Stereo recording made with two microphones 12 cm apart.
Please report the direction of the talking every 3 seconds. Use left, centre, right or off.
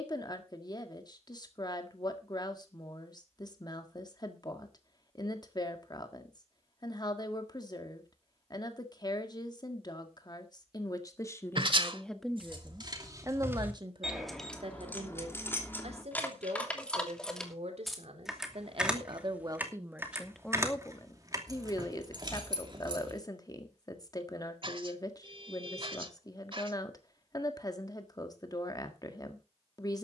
left, left, left, left, right, right, right, left, left, left.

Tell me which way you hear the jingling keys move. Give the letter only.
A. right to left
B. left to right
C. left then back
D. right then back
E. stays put
C.